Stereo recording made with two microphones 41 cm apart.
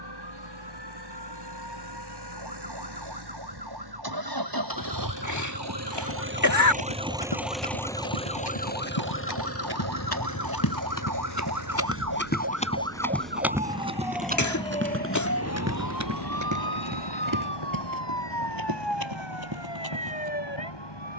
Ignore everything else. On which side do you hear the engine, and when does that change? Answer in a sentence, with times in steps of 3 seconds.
You can hear the engine on the right from 0 s, in the centre from 6 s and on the left from 9 s.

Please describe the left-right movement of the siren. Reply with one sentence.
You can hear the siren move to the left.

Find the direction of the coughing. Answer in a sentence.
You can hear the coughing on the left.